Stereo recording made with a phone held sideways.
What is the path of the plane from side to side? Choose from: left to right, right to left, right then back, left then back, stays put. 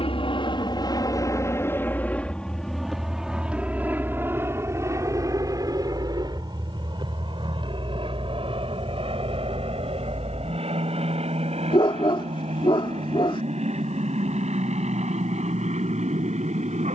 left to right.